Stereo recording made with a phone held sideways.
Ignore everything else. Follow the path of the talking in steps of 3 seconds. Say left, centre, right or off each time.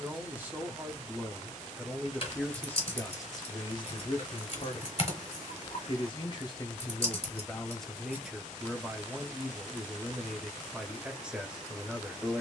centre, left, centre, centre.